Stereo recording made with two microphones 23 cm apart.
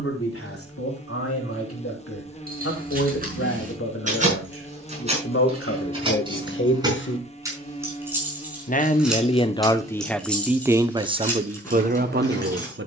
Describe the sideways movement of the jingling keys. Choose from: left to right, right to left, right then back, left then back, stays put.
right to left.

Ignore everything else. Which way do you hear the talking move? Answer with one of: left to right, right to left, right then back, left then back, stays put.
left to right.